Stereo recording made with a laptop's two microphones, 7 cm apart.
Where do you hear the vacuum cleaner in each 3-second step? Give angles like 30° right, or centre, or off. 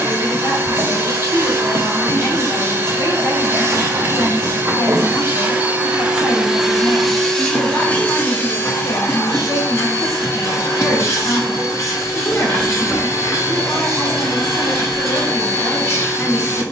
30° right, 30° right, 10° left, 40° left, 40° left, 40° left.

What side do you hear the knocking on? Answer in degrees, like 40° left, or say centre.
30° right.